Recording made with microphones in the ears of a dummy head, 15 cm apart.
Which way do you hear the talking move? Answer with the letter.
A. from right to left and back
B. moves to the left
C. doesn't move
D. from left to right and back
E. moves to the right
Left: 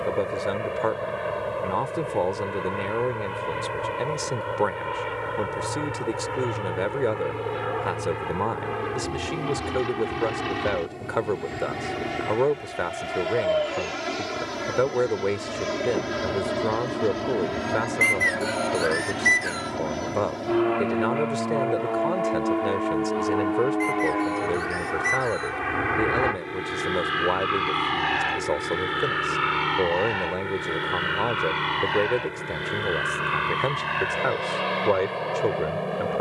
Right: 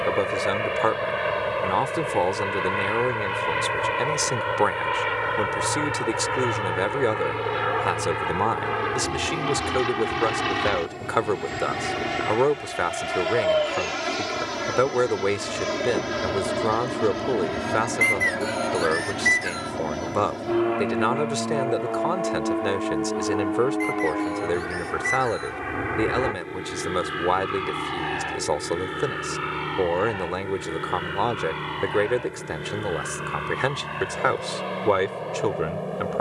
C.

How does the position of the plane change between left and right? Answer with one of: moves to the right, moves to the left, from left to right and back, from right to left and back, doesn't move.
moves to the left.